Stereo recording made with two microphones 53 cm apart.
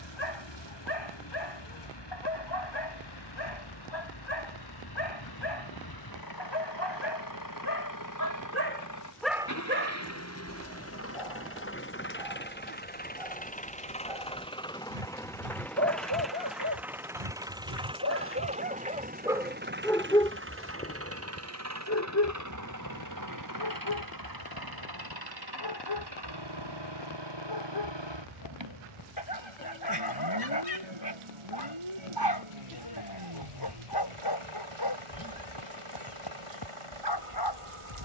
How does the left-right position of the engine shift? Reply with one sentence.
You can hear the engine go from the left side to the right.